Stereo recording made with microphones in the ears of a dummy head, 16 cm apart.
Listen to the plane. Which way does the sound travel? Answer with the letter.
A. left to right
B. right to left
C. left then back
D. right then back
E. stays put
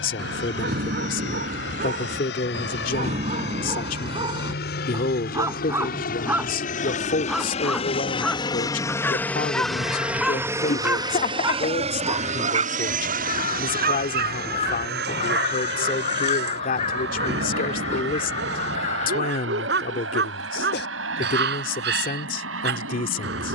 A.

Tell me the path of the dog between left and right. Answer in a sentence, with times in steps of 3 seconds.
You can hear the dog on the right from 0 s, in the centre from 6 s and on the right from 12 s.